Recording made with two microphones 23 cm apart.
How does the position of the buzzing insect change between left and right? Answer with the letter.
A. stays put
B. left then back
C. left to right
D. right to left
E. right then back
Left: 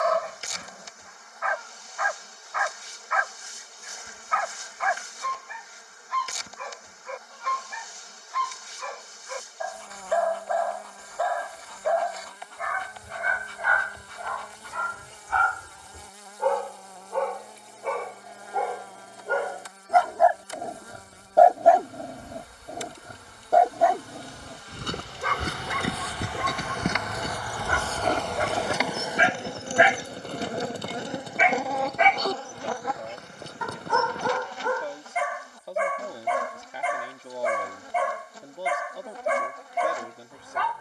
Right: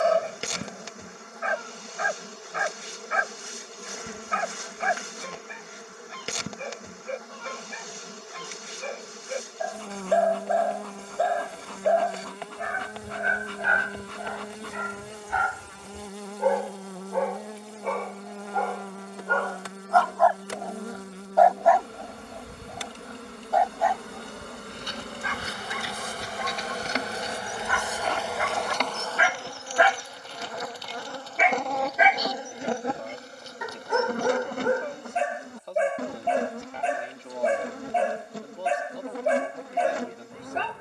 B.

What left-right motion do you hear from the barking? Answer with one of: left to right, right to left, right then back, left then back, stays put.
left then back.